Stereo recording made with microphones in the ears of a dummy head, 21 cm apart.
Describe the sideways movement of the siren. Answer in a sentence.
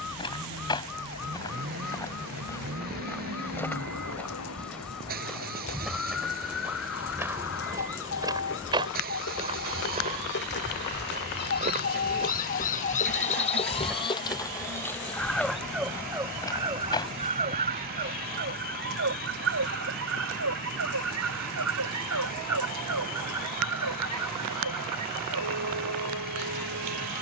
In this clip you hear the siren go from the left side to the right.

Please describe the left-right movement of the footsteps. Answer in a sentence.
You can hear the footsteps go right and come back.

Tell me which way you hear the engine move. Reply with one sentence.
In this clip you hear the engine stay in one place.